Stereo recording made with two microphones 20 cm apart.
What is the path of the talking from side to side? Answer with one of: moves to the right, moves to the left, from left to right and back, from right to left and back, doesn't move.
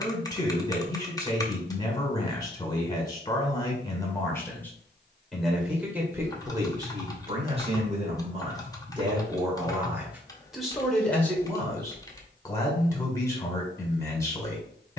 from left to right and back.